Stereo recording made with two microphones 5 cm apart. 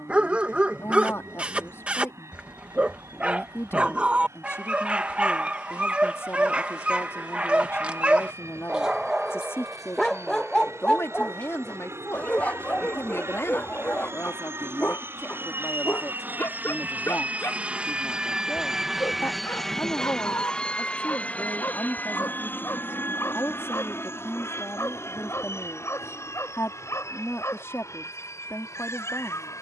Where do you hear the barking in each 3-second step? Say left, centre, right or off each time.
right, right, right, centre, left, left, left, left, left, left.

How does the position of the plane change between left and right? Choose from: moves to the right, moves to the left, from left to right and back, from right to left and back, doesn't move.
moves to the left.